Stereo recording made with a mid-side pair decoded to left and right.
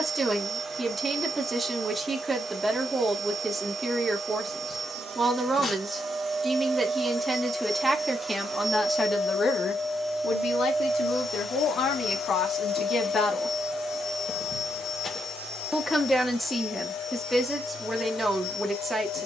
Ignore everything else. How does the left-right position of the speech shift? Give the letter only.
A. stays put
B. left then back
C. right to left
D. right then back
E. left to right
B.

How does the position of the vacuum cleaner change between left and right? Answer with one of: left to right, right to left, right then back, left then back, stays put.
right to left.